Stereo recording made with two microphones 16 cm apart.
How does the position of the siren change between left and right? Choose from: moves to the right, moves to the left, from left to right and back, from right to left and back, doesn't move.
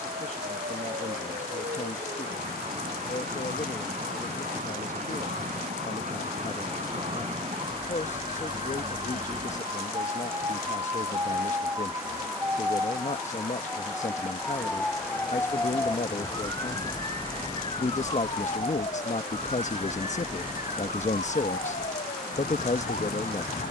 moves to the left.